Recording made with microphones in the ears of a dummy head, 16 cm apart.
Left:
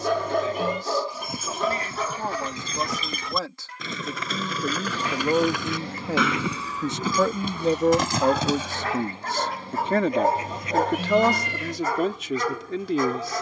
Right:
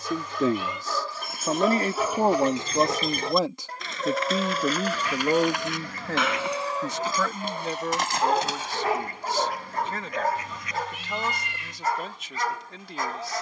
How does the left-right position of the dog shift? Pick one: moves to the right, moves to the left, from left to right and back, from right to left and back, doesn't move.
from left to right and back.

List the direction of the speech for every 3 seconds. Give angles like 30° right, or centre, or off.
30° right, 10° right, 30° left, 50° left, 60° left.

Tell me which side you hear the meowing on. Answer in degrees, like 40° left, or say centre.
40° left.